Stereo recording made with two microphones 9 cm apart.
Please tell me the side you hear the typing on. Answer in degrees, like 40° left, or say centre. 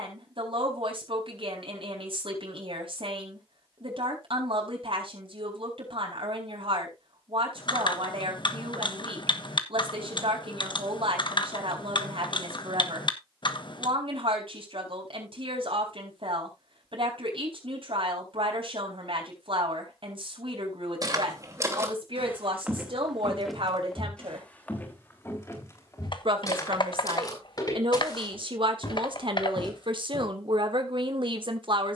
60° left.